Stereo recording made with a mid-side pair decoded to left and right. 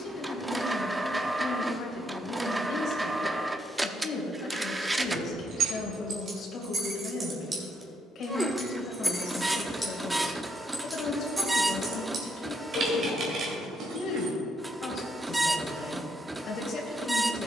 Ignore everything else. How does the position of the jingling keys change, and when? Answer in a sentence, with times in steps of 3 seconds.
In this clip you hear the jingling keys not at all from 0 s, on the right from 3 s, in the centre from 9 s, on the right from 12 s and not at all from 15 s.